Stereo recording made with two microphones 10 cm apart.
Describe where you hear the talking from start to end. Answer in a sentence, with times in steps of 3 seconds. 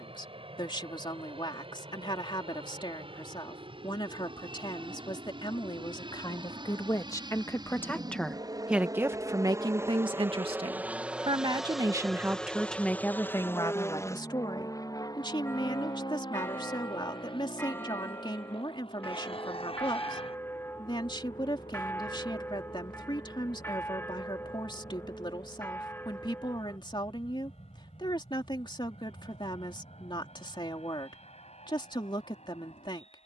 You can hear the talking on the left from 0 s, on the right from 9 s and on the left from 12 s.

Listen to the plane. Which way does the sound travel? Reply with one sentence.
In this clip you hear the plane move to the left.